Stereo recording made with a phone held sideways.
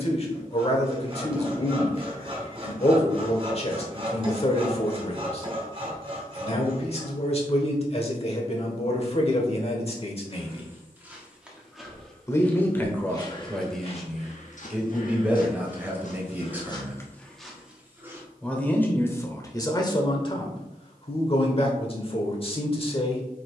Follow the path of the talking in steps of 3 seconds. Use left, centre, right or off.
left, left, left, left, centre, centre, left, left.